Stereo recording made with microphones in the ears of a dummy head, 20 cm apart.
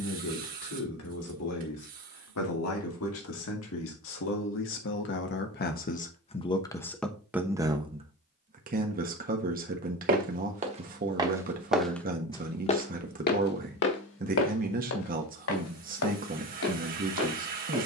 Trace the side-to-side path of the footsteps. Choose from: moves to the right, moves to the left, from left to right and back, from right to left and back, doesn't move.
moves to the left.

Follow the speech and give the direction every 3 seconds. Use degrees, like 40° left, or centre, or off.
80° left, 60° left, 10° right, 40° right, 40° right, 40° right.